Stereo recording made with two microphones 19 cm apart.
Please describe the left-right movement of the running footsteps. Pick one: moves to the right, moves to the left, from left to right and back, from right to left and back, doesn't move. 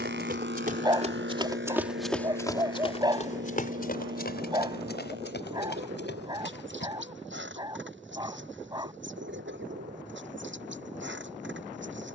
moves to the left.